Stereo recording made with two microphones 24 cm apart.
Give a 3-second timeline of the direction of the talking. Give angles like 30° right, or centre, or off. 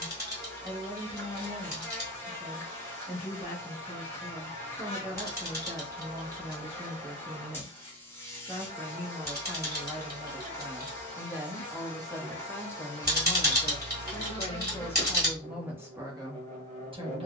30° right, 30° right, 30° right, 20° right, 20° left, 10° right.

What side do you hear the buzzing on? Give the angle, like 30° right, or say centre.
10° left.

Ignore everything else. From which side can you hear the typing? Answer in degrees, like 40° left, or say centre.
40° right.